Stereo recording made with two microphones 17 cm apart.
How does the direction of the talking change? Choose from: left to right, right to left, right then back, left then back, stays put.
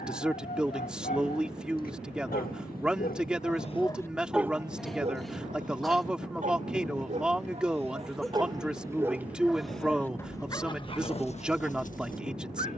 stays put.